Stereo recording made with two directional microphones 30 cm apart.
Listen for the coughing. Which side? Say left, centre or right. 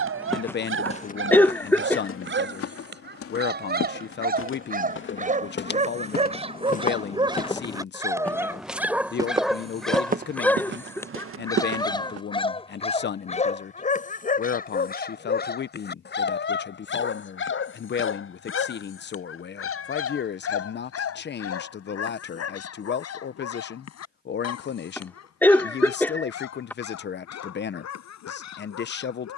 centre.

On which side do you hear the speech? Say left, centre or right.
left.